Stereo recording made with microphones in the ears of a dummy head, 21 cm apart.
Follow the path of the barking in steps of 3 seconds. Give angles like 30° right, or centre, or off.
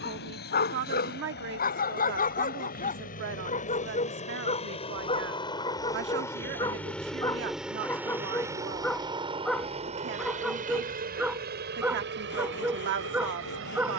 40° left, 20° left, 10° left, centre, 10° right.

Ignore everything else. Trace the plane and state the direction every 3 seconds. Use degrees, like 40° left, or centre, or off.
50° left, 30° left, centre, 30° right, 50° right.